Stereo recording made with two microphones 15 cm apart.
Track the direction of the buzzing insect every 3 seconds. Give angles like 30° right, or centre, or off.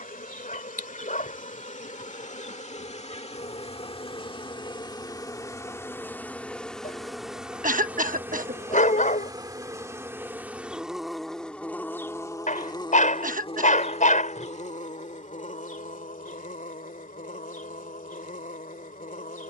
60° left, 30° left, centre, 10° right, 40° left, 60° left, 60° left.